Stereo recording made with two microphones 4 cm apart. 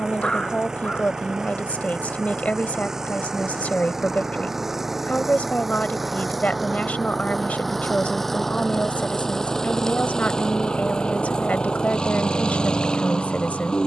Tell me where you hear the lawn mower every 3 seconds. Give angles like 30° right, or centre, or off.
10° right, 10° right, centre, 20° left, 20° left.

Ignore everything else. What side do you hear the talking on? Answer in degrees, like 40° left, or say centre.
40° left.